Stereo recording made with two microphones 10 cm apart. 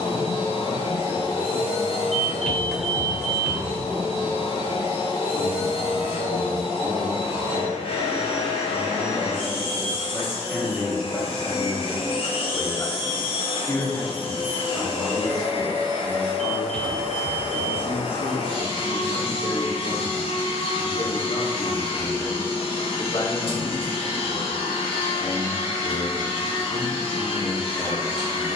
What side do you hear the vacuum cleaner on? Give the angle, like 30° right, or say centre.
60° left.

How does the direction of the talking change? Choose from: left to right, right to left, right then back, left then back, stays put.
right to left.